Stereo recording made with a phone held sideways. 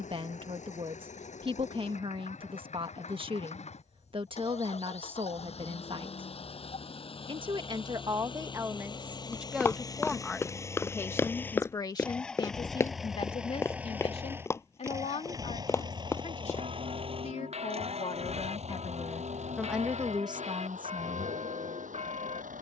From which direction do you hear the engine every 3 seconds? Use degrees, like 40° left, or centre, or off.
60° left, 50° left, 40° left, 20° left, 10° right, 30° right, 50° right, 60° right.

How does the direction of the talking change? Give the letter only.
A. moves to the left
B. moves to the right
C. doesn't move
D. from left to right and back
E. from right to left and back
E.